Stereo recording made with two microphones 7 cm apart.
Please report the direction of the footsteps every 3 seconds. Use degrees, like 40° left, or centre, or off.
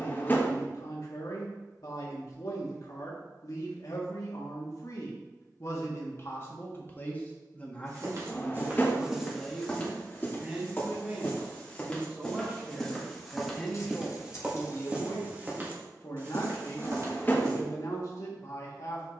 off, off, 30° right, 20° left, centre, 40° right, off.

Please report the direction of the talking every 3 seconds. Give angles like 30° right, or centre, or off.
60° left, 50° left, 20° left, 10° right, centre, 50° left, 50° left.